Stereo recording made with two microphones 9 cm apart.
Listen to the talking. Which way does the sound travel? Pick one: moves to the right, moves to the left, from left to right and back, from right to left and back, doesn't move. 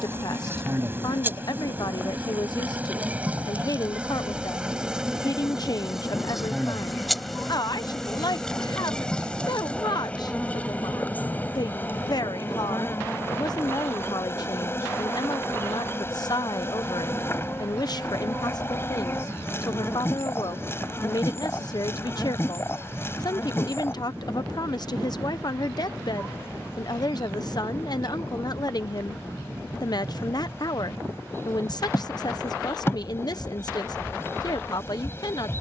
doesn't move.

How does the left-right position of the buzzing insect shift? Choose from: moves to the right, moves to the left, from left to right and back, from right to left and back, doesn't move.
moves to the left.